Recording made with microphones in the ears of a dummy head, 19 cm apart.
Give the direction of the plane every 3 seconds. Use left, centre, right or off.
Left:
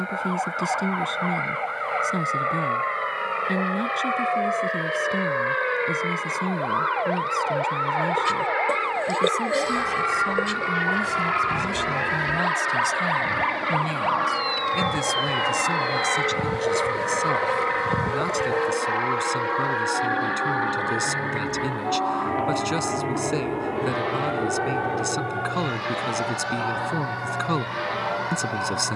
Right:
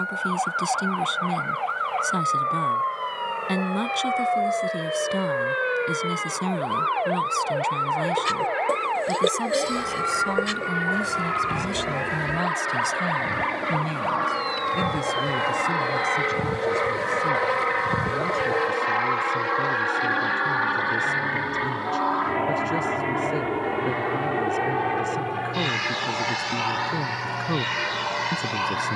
left, left, left, left, left, centre, right, right, right, right.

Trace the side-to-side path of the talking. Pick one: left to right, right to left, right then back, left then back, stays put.
right to left.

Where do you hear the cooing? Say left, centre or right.
centre.